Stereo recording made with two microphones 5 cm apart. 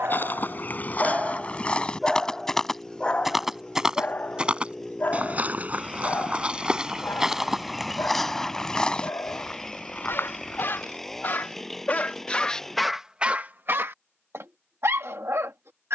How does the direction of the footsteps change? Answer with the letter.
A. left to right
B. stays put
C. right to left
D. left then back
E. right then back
E.